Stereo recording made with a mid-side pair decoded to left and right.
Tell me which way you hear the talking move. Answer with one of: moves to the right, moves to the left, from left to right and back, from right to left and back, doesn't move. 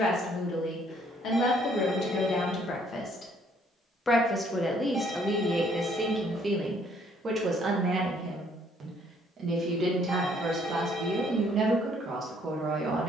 moves to the right.